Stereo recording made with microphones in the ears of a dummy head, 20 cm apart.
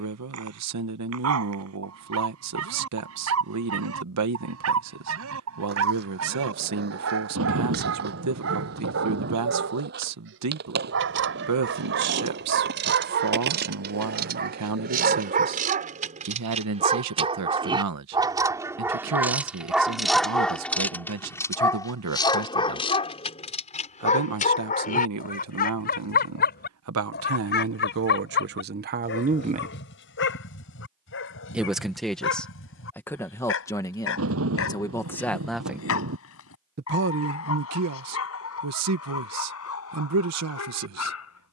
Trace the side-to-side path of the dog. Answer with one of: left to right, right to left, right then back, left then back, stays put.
right to left.